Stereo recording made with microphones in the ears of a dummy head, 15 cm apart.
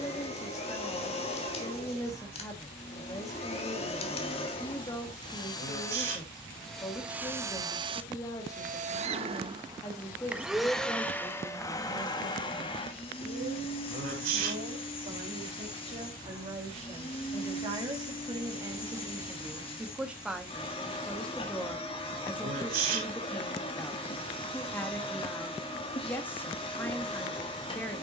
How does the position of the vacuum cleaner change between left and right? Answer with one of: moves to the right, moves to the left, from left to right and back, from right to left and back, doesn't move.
from left to right and back.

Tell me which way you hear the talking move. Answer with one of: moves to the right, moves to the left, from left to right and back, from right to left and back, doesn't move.
from left to right and back.